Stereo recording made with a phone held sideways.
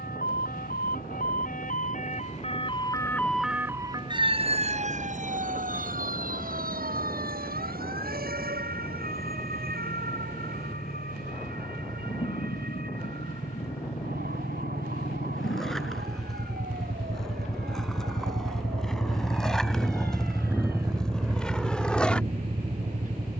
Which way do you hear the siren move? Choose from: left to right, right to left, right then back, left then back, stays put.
left to right.